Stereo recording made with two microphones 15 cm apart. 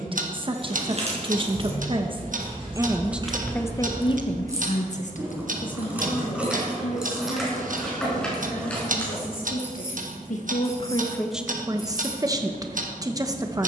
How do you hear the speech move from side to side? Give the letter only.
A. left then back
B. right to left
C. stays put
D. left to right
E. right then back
A.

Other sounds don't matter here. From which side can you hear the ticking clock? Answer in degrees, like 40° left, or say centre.
70° right.